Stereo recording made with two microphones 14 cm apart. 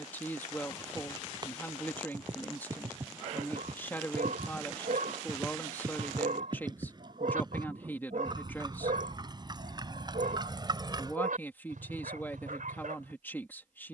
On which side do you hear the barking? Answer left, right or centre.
right.